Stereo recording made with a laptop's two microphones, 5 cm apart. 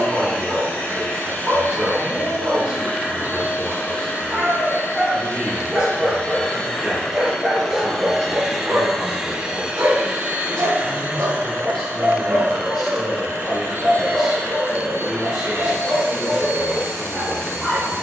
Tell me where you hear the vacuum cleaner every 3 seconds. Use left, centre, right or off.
left, left, centre, right, right, right.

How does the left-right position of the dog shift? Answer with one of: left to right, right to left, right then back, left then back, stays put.
right then back.